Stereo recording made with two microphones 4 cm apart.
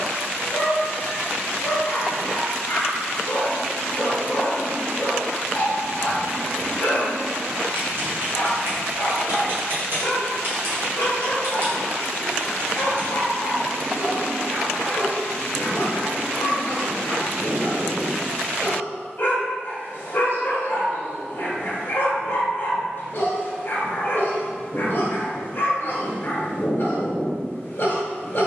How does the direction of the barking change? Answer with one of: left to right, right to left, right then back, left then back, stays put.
stays put.